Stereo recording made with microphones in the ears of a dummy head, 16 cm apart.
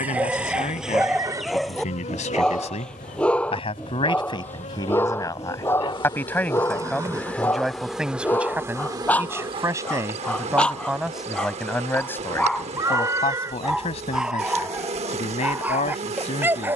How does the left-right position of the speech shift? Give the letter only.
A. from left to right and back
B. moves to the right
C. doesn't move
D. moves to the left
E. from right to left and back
A.